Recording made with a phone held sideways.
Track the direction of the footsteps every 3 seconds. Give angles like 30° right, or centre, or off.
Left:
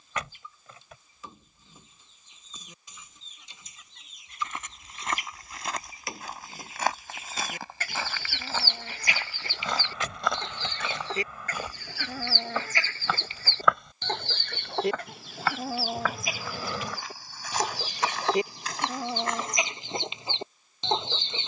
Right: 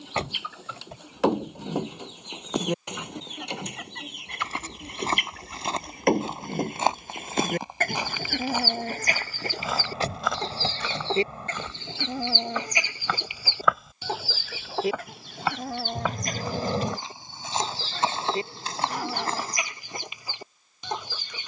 off, 30° right, 20° right, centre, centre, 20° right, 30° right.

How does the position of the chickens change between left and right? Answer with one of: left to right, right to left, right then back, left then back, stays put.
right to left.